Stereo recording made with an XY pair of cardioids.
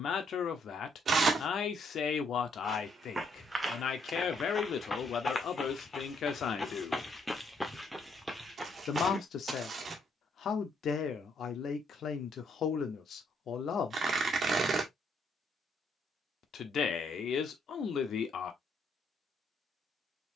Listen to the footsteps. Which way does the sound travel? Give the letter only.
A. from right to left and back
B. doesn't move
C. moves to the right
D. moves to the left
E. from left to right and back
A.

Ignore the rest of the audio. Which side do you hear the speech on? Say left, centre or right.
left.